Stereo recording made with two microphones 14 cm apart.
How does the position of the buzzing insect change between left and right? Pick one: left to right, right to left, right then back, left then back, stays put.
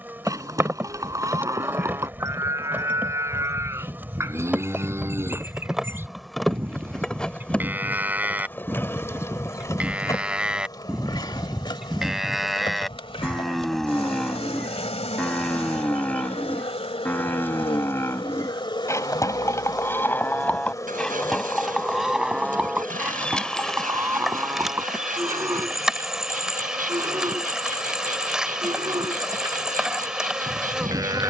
left then back.